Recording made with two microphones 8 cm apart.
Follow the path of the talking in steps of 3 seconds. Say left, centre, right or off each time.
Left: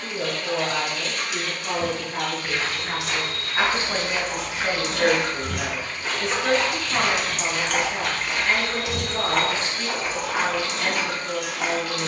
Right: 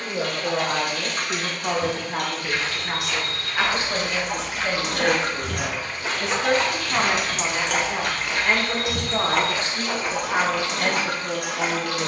right, centre, right, right.